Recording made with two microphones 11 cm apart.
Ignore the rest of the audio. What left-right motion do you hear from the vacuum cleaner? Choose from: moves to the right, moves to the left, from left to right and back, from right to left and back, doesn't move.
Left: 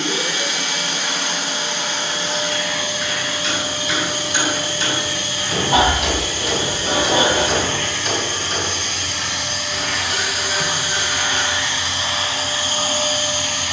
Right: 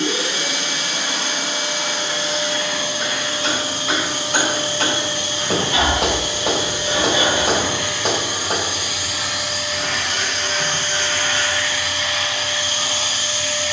moves to the left.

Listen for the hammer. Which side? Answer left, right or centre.
right.